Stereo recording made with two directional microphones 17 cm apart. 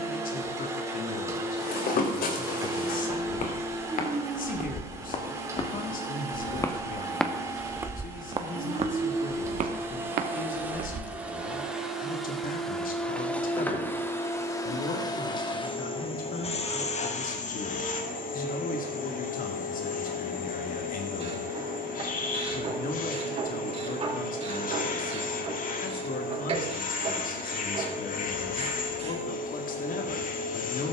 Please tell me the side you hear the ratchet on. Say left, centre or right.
right.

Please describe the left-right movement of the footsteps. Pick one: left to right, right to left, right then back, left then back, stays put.
left to right.